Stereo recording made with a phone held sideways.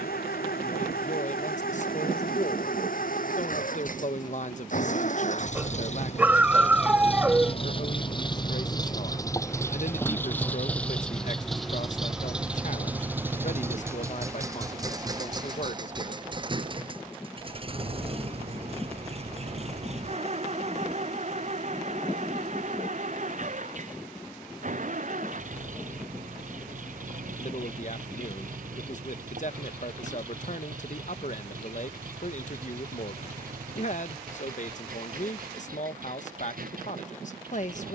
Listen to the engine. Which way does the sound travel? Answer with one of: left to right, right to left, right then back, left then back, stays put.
left to right.